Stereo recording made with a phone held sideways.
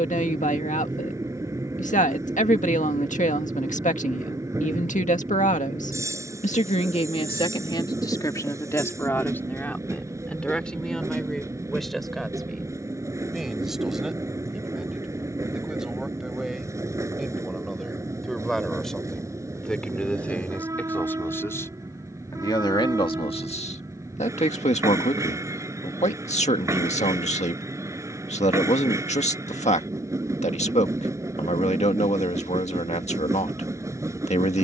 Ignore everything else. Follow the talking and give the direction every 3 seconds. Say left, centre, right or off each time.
left, left, left, centre, centre, centre, centre, left, left, left, left, left.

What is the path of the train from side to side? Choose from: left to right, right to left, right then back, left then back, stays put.
stays put.